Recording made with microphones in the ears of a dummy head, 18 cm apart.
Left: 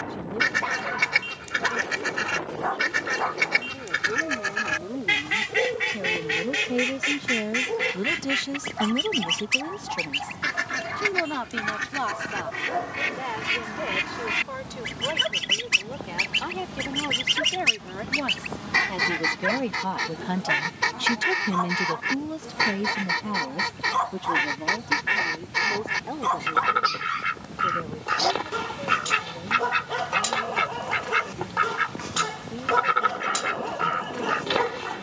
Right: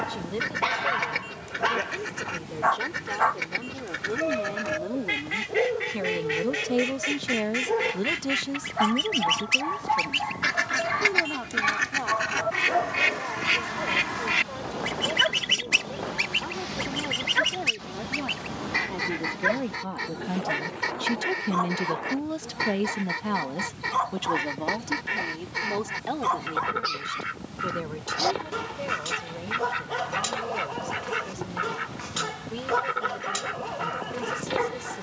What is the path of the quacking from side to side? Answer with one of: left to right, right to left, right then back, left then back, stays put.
right then back.